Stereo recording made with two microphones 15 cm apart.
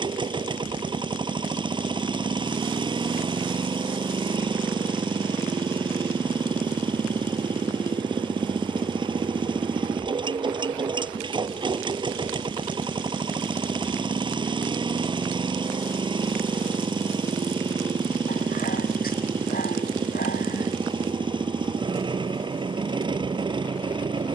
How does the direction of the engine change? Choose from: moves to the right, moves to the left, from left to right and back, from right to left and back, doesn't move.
doesn't move.